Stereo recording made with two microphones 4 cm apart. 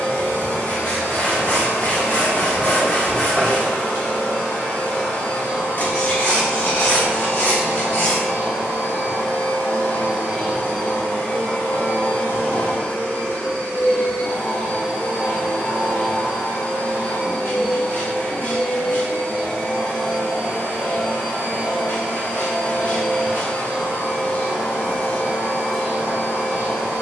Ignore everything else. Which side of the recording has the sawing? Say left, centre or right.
left.